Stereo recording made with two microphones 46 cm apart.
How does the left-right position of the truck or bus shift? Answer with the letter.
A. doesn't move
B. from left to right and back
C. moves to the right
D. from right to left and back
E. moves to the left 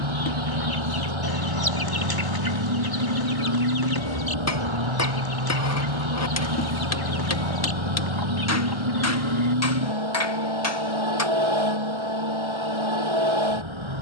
A.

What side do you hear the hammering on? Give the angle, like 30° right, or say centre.
30° left.